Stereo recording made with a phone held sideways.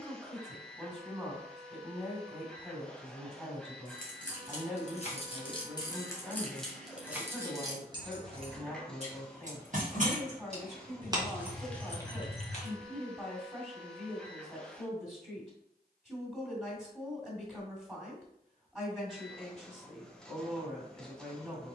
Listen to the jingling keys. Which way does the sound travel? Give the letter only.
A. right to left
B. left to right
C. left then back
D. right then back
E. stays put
D.